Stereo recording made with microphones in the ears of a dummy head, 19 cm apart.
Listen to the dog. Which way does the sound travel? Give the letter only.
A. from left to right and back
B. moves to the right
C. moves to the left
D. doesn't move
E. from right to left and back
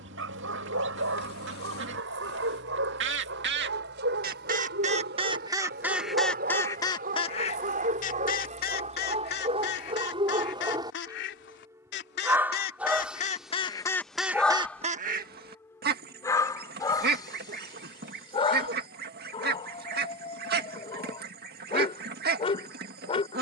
C.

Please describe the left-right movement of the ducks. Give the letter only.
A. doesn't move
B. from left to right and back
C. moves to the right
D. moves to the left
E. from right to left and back
E.